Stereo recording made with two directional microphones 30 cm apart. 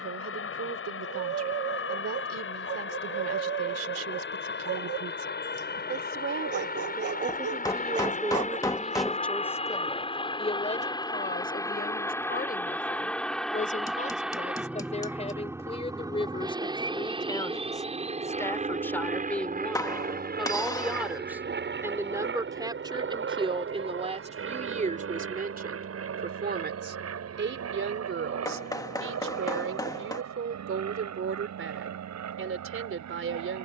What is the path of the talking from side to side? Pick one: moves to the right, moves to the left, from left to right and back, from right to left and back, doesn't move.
from right to left and back.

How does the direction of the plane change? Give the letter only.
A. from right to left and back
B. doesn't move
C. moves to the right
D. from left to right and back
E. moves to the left
C.